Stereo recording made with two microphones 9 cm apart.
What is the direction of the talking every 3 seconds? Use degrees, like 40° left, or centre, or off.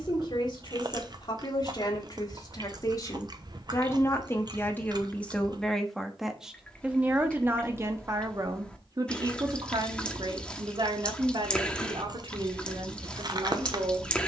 50° left, 20° left, 20° right, 60° right, 70° right.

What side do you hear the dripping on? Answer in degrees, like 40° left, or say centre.
10° left.